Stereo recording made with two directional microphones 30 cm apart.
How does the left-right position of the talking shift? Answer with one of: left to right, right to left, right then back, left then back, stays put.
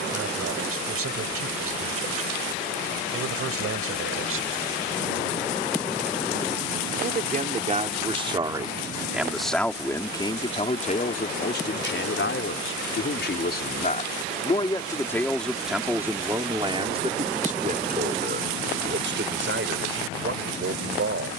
left then back.